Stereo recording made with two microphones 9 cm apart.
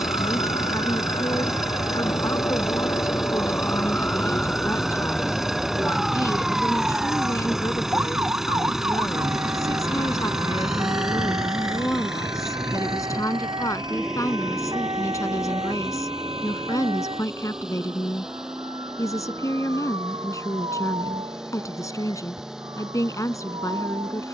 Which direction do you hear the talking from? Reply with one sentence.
In this clip you hear the talking on the left.